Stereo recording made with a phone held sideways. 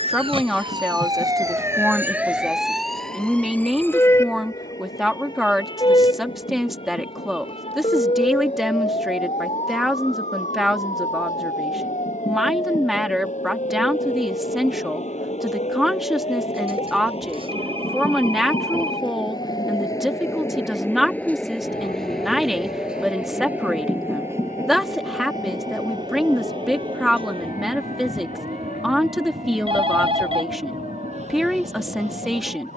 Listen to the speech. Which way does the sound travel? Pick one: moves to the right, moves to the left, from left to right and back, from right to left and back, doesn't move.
doesn't move.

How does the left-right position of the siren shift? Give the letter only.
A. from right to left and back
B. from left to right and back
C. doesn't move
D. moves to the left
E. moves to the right
D.